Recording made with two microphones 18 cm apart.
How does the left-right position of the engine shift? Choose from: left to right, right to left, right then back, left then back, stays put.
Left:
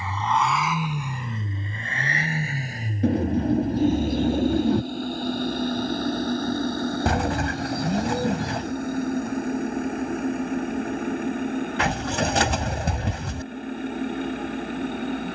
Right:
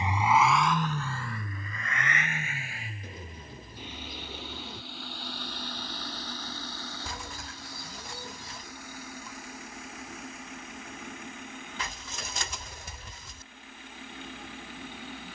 right to left.